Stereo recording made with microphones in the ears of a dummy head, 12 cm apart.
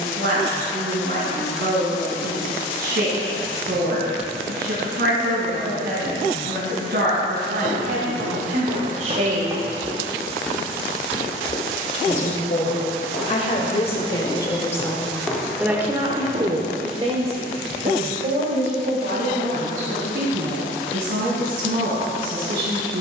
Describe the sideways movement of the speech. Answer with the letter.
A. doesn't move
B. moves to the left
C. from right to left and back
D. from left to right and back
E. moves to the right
C.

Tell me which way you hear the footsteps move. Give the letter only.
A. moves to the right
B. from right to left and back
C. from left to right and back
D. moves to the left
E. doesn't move
B.